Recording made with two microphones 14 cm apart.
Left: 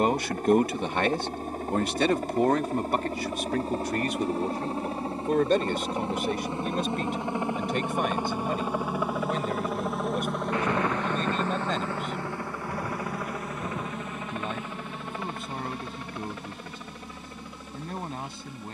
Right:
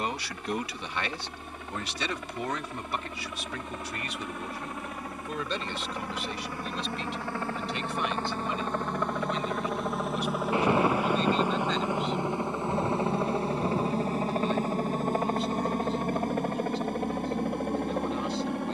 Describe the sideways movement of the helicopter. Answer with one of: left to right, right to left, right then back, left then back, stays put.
left to right.